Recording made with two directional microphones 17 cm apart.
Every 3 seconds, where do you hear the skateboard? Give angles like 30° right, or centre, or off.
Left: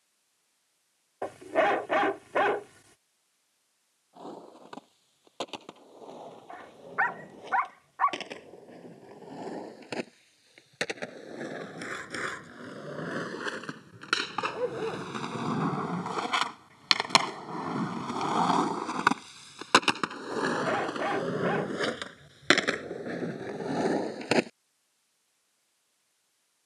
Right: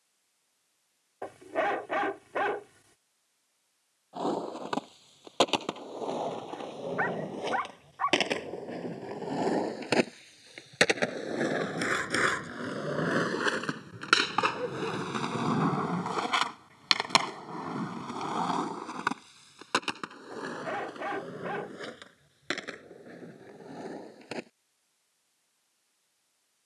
off, 70° right, 60° right, 60° right, 40° right, centre, 40° left, 60° left, 70° left.